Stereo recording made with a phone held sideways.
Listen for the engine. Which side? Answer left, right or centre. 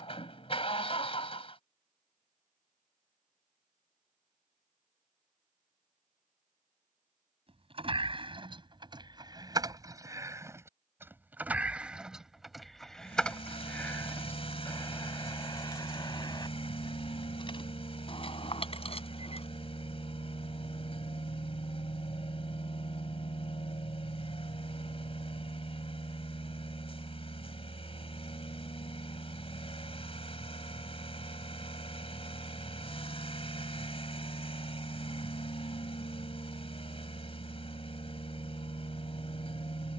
left.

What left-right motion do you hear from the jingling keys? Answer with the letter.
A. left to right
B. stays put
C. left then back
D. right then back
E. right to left
E.